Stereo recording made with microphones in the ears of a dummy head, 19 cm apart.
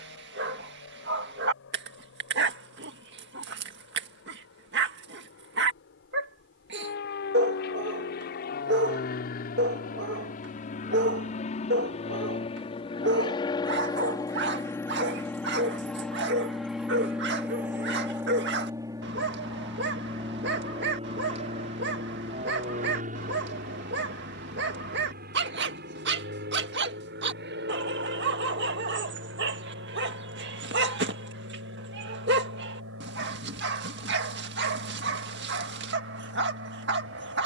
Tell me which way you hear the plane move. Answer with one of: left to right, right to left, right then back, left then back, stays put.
left to right.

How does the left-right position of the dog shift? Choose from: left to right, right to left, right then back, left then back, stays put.
stays put.